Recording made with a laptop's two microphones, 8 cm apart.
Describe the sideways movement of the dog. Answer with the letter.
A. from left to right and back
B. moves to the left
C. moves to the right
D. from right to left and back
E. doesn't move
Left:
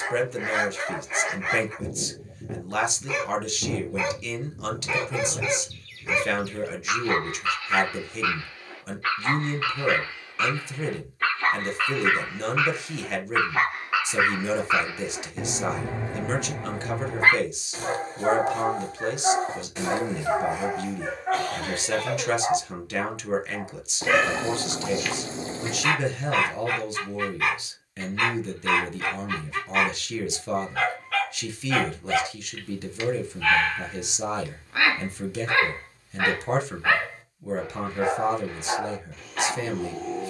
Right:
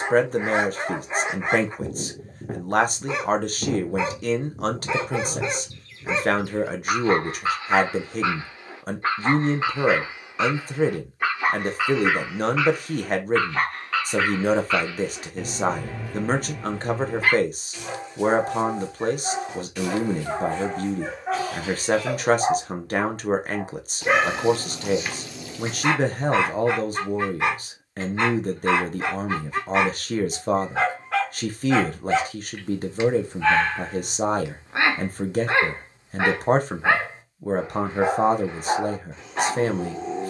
D.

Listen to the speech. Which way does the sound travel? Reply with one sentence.
You can hear the speech stay in one place.